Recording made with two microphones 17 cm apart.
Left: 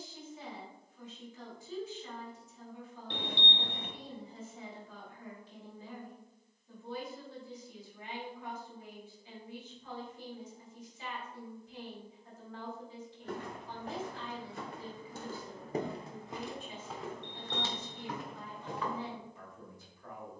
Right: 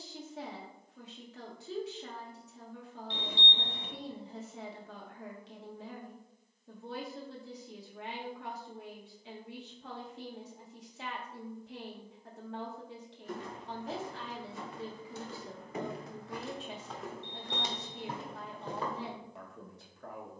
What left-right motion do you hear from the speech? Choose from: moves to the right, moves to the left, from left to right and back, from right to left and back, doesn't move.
doesn't move.